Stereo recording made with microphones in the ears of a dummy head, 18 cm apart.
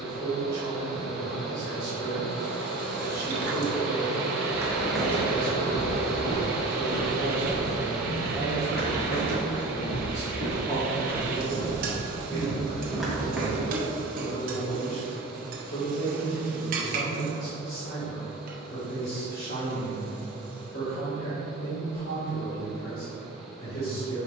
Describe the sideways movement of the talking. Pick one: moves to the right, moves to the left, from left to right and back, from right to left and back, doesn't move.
moves to the left.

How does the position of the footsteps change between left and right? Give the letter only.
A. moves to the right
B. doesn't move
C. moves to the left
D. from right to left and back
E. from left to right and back
D.